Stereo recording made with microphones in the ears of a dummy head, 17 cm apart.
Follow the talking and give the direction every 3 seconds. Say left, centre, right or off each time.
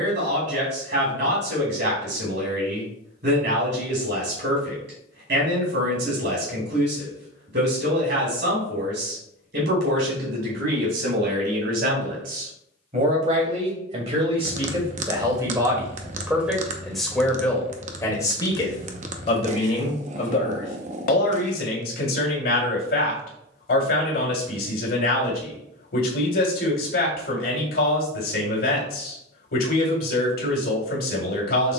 right, right, right, right, right, centre, left, left, left, left, left.